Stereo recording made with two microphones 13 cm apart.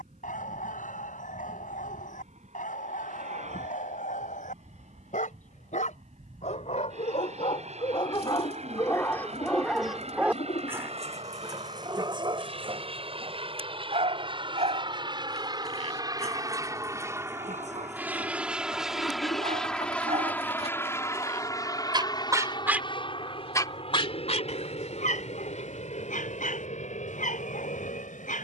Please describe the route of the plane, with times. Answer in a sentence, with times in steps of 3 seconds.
You can hear the plane on the right from 0 s, in the centre from 18 s and on the left from 21 s.